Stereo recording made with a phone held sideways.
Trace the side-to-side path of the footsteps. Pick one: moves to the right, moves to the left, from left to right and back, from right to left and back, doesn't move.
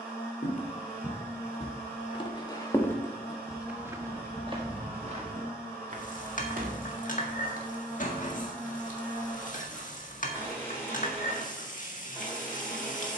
moves to the right.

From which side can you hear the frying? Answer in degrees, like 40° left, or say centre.
60° left.